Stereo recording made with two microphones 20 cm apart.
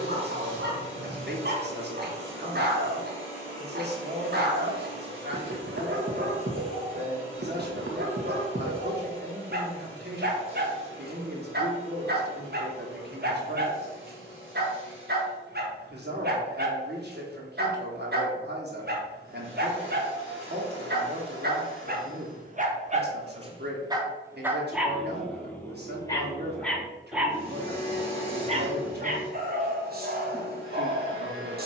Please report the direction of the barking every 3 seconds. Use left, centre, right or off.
right, right, right, right, right, right, right, right, centre, right, right.